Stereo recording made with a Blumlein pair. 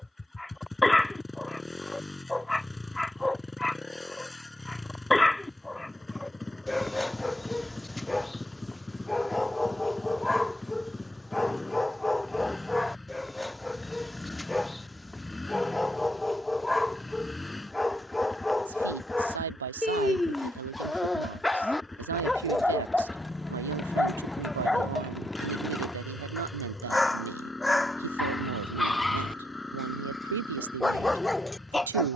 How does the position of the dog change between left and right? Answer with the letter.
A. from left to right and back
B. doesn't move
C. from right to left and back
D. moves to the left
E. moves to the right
B.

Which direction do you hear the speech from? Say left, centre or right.
right.